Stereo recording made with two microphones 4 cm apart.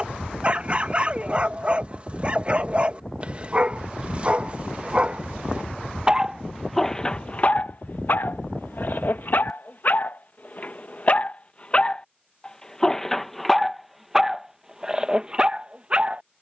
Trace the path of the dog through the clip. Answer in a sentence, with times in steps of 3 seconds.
In this clip you hear the dog on the right from 0 s, on the left from 6 s, in the centre from 12 s and on the right from 15 s.